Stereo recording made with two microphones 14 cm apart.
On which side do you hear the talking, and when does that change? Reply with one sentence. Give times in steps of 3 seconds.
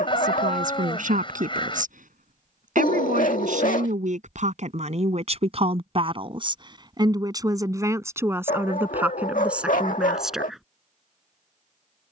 You can hear the talking on the right from 0 s and in the centre from 9 s.